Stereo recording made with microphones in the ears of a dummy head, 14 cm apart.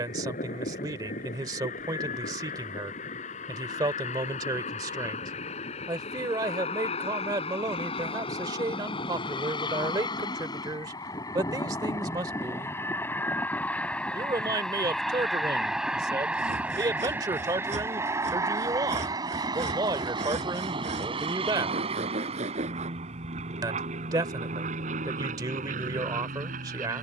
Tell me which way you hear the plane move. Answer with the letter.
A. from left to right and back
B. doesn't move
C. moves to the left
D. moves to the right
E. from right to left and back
D.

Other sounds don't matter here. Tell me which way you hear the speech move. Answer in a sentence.
You can hear the speech stay put.